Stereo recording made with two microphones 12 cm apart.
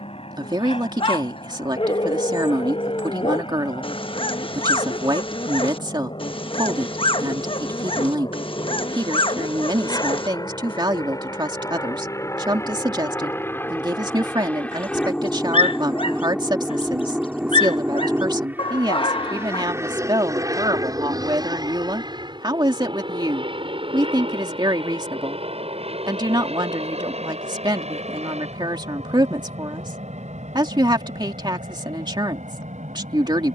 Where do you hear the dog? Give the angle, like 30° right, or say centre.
50° left.